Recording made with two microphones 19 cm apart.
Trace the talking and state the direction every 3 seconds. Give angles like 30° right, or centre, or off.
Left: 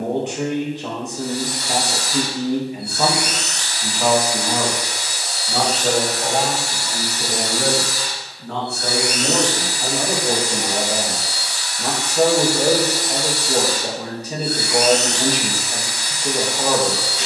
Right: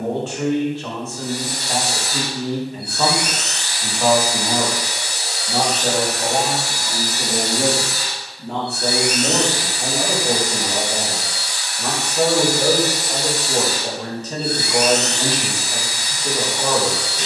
20° left, centre, 20° right, centre, 10° left, 10° left.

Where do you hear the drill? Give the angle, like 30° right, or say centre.
60° right.